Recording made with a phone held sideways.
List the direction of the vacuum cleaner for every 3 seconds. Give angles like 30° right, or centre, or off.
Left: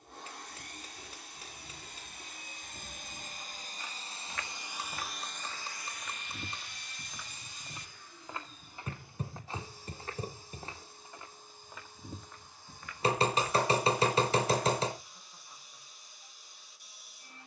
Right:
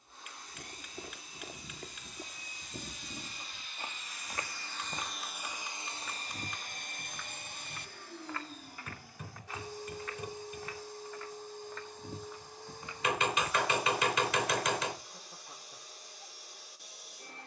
60° left, 20° left, 60° right, 70° right, 80° right, 80° right.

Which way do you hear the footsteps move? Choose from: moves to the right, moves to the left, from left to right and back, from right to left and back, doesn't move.
from right to left and back.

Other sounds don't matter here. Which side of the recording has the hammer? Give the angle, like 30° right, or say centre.
30° left.